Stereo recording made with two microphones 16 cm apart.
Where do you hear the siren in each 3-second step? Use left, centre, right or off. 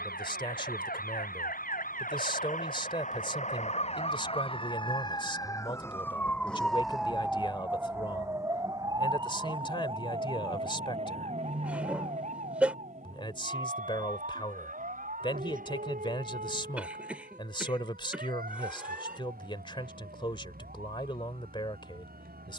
left, left, centre, right, right, right, right, right.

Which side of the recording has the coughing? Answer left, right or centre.
centre.